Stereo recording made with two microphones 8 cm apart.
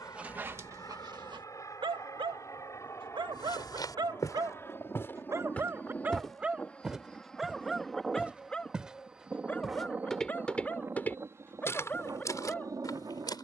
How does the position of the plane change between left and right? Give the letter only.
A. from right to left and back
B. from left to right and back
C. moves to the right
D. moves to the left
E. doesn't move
C.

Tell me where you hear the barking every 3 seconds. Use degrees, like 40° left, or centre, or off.
50° right, 50° right, centre, 20° left, 20° left.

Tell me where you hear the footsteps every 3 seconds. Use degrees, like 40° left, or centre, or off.
off, 40° left, 10° right, 20° left, 50° left.